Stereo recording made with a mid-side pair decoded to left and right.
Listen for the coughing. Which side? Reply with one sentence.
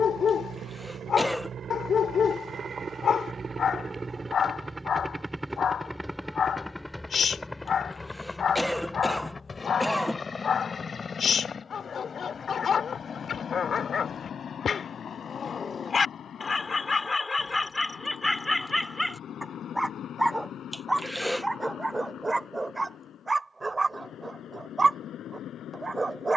You can hear the coughing in the centre.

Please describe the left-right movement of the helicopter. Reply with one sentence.
In this clip you hear the helicopter travel towards the left.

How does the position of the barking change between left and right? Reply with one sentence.
You can hear the barking move to the right.